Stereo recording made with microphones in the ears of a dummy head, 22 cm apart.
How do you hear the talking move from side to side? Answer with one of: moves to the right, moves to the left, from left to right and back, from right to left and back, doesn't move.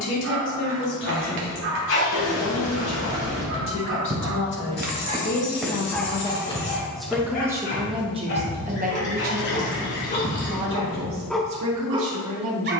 moves to the right.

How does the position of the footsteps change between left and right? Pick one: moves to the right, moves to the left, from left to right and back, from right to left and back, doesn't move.
moves to the left.